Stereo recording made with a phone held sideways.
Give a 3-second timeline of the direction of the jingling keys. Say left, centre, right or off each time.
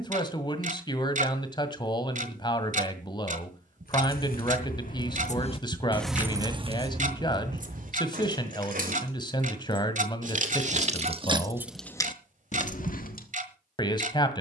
off, left, right, right, left.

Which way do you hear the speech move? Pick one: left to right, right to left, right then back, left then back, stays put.
stays put.